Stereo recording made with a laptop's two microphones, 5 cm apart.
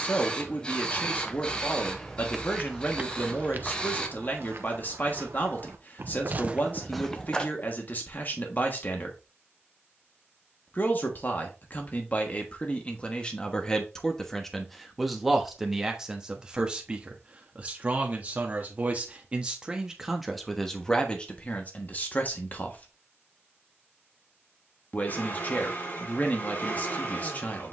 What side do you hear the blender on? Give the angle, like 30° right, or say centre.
50° left.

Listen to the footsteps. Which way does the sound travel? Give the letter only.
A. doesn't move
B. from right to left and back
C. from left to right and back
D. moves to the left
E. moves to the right
C.